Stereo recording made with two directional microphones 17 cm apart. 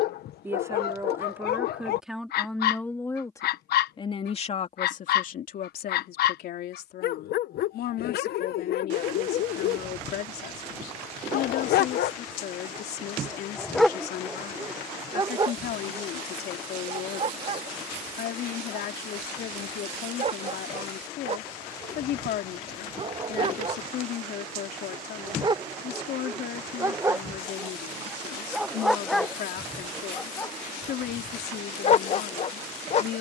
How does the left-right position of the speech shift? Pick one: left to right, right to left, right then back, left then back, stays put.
right to left.